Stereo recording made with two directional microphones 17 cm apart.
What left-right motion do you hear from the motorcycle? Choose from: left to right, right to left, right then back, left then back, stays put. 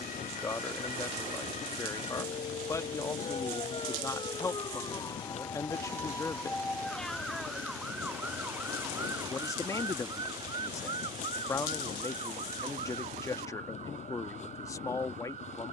stays put.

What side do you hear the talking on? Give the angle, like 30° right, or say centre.
20° left.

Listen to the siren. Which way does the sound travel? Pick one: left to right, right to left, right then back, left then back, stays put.
left to right.